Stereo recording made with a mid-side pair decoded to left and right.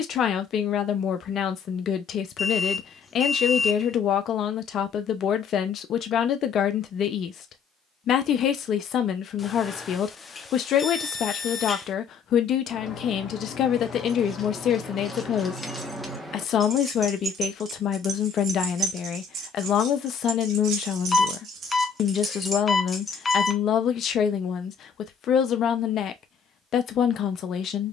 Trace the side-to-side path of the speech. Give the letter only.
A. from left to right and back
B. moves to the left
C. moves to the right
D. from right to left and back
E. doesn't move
E.